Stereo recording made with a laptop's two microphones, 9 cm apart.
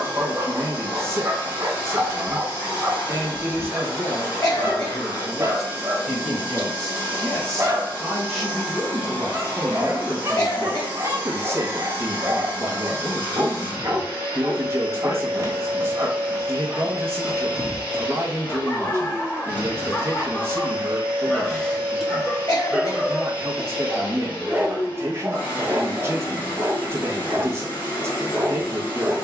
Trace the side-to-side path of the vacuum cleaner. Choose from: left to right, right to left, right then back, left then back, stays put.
stays put.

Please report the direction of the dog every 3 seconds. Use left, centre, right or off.
right, right, right, right, right, right, left, centre, right, right.